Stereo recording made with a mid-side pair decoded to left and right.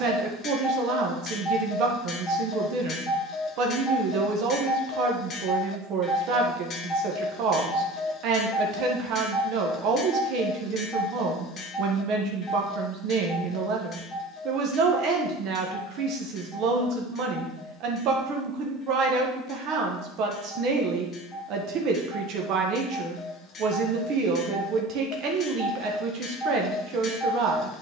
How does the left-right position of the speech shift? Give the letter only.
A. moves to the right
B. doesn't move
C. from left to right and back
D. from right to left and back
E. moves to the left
B.